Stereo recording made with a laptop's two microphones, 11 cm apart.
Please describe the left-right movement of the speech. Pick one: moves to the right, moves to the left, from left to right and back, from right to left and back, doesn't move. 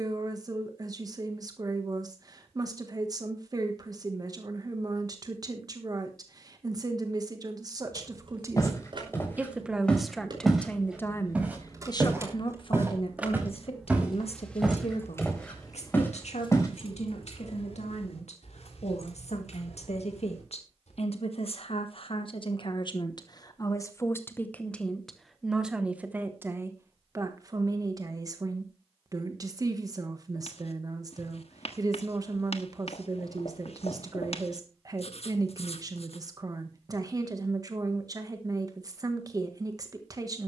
from right to left and back.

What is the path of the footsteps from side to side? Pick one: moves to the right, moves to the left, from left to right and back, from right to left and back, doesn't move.
from left to right and back.